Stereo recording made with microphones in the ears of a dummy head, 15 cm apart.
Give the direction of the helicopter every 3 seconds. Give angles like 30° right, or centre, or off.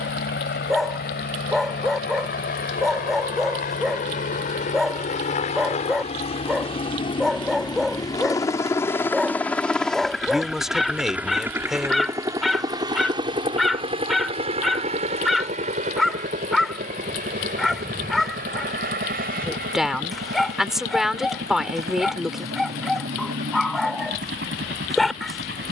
60° left, 50° left, 30° left, centre, 30° right, 50° right, 60° right, 60° right, 70° right.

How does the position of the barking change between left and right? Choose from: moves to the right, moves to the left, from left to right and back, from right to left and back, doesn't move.
doesn't move.